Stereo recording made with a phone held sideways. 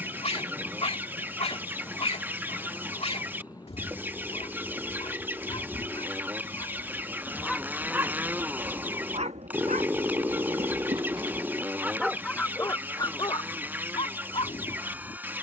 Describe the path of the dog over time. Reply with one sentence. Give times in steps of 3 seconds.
In this clip you hear the dog on the left from 0 s, in the centre from 6 s, on the right from 9 s and on the left from 12 s.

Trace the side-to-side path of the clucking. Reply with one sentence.
You can hear the clucking stay put.